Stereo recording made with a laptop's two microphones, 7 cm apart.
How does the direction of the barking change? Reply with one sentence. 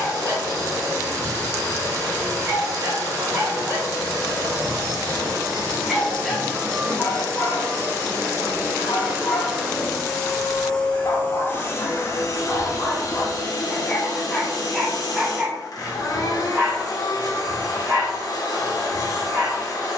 In this clip you hear the barking move from right to left and back again.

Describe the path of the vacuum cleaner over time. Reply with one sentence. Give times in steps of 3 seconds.
You can hear the vacuum cleaner on the right from 0 s, in the centre from 9 s and on the left from 12 s.